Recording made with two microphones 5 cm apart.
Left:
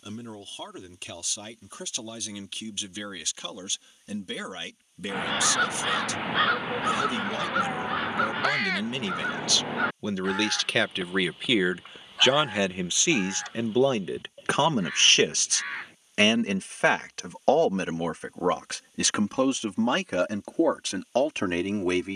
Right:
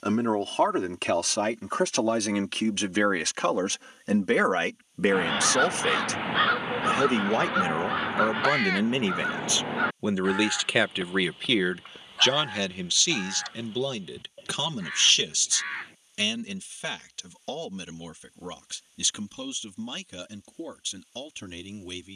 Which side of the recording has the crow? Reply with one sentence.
You can hear the crow in the centre.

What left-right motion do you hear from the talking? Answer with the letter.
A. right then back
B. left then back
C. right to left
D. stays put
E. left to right
C.